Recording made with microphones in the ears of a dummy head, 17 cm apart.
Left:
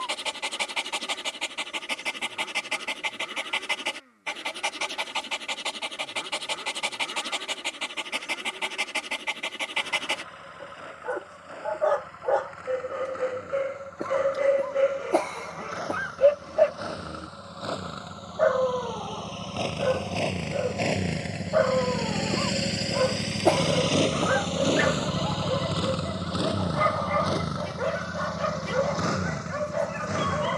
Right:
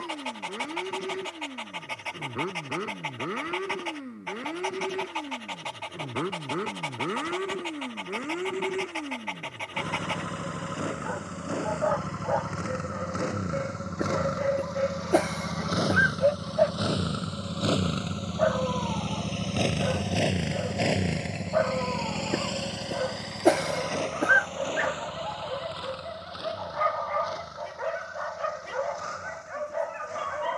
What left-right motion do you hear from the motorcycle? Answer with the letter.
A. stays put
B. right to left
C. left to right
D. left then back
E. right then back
B.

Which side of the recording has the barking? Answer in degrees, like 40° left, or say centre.
50° left.